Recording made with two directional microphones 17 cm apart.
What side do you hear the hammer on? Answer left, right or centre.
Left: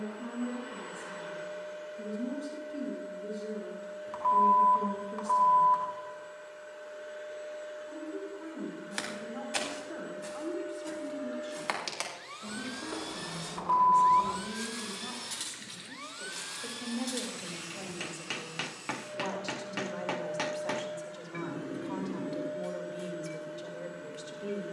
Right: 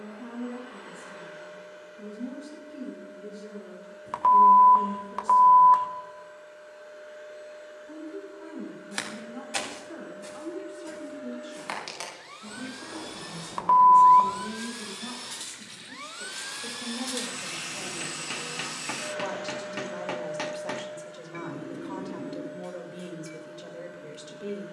centre.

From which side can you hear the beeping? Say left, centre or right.
right.